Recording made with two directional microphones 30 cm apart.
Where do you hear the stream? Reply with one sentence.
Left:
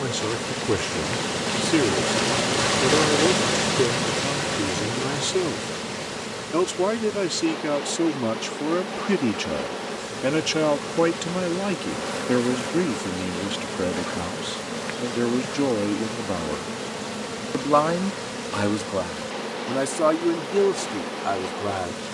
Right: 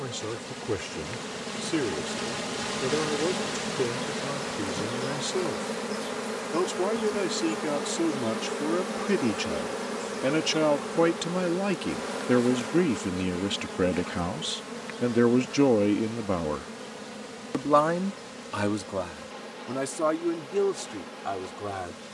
You can hear the stream on the left.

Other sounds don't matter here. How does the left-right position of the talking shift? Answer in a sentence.
In this clip you hear the talking go right and come back.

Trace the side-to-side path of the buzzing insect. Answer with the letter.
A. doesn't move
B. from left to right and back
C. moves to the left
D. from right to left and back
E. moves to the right
B.